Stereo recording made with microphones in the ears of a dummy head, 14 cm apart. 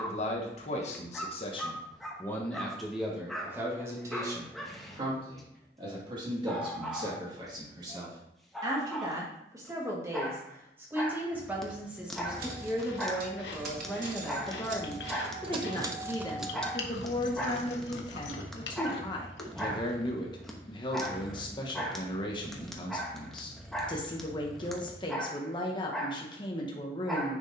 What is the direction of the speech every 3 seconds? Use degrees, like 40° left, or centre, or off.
30° left, 20° right, 30° right, 10° right, centre, 20° left, 30° left, 30° left, 30° left.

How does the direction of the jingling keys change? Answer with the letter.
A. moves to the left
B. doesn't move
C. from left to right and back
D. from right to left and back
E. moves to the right
A.